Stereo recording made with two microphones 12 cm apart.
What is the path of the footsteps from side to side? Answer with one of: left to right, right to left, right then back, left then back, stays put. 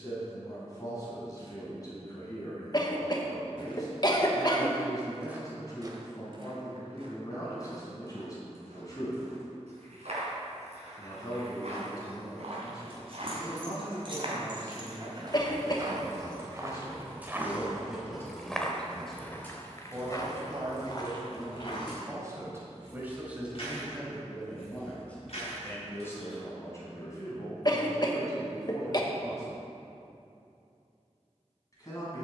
right then back.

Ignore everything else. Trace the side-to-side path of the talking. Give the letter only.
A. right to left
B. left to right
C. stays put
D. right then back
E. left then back
D.